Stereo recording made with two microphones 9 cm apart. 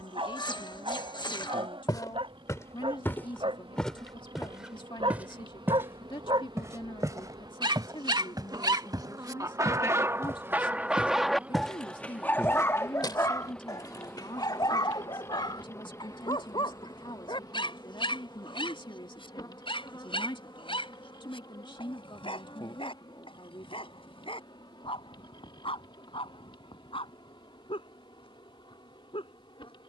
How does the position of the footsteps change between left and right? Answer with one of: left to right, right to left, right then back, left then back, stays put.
right then back.